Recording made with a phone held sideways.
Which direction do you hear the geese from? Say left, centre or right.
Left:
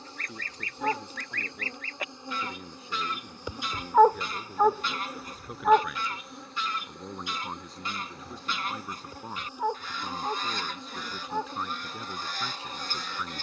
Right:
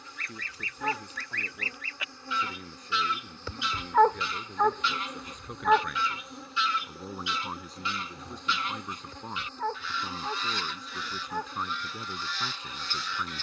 left.